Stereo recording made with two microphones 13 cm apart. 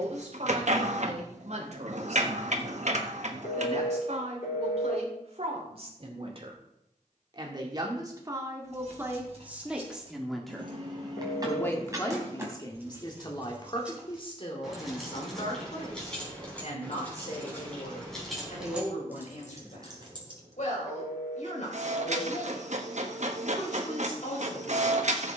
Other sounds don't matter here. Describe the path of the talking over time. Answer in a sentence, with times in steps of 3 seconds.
In this clip you hear the talking on the right from 0 s, in the centre from 9 s and on the left from 12 s.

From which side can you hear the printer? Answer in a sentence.
You can hear the printer on the right.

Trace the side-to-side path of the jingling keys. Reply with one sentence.
You can hear the jingling keys move from right to left and back again.